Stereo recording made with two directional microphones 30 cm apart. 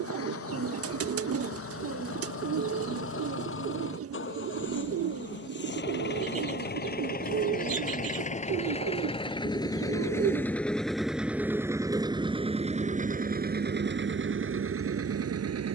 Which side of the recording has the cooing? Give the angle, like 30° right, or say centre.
50° right.